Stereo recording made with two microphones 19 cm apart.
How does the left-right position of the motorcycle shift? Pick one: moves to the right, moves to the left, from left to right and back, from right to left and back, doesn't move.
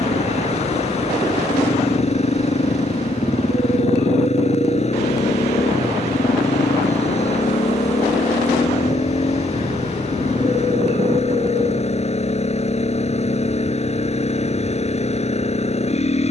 doesn't move.